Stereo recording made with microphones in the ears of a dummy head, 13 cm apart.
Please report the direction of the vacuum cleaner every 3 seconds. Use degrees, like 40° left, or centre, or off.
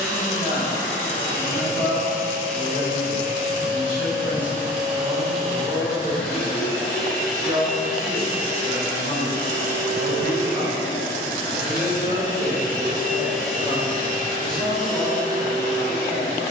50° right, 20° right, centre, 30° right, 50° right, 60° right.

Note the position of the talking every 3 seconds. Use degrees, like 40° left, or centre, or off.
30° left, 10° left, 20° right, 40° right, 10° right, 10° left.